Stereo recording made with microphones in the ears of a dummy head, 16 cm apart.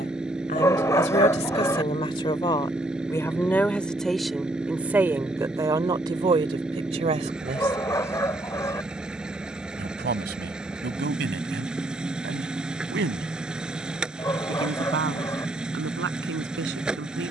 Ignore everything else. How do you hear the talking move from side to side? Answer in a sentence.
You can hear the talking move to the right.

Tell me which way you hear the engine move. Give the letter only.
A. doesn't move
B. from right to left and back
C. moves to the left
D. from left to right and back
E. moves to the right
A.